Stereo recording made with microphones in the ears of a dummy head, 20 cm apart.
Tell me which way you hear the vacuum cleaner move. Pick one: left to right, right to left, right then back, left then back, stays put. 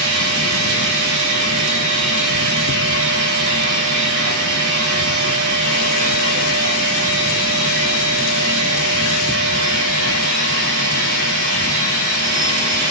stays put.